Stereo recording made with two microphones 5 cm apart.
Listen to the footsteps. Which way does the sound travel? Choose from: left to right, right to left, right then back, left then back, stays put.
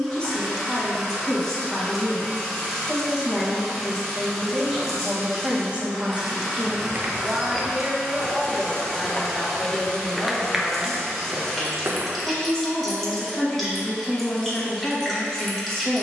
left then back.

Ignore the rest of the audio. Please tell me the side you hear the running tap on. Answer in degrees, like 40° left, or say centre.
centre.